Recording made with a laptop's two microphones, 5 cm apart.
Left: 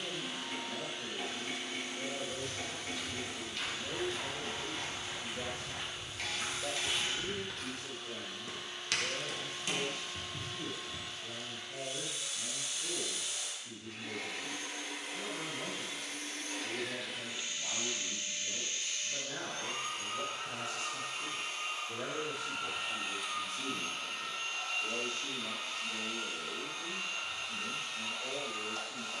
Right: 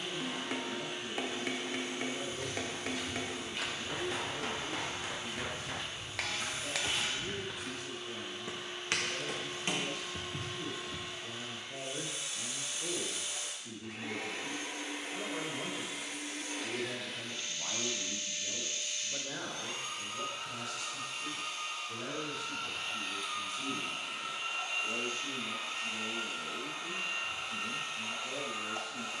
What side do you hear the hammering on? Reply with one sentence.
You can hear the hammering on the right.